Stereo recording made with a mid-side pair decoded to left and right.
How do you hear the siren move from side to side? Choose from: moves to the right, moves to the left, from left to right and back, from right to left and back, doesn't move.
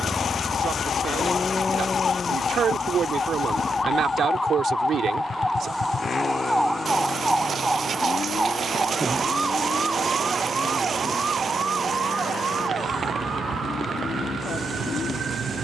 moves to the right.